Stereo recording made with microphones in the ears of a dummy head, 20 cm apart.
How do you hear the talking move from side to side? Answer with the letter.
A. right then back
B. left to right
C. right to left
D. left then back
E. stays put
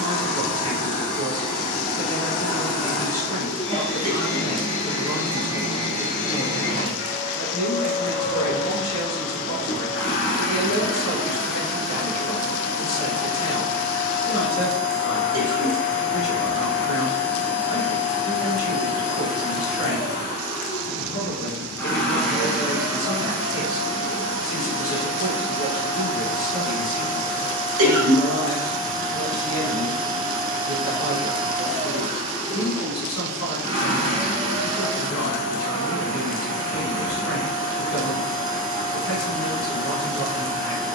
E.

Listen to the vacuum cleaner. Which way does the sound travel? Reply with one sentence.
You can hear the vacuum cleaner go from the left side to the right.